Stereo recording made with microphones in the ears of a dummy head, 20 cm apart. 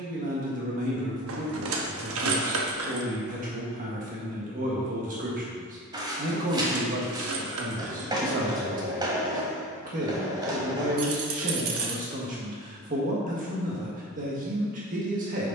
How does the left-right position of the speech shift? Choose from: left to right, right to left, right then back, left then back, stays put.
stays put.